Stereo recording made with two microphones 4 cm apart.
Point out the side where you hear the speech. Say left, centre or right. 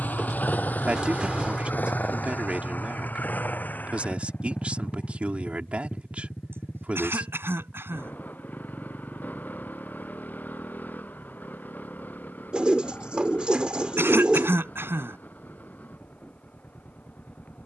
right.